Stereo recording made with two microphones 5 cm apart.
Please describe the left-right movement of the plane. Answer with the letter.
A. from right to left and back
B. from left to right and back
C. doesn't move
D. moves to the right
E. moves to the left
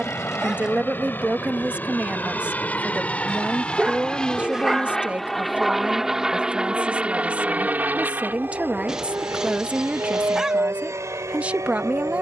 D.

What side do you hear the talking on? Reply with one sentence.
You can hear the talking on the right.